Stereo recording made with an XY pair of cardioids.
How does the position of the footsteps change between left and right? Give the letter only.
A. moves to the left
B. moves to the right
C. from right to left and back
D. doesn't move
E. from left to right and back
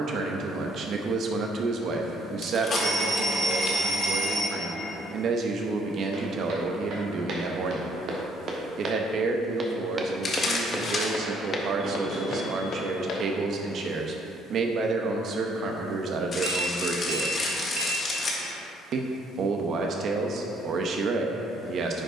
A.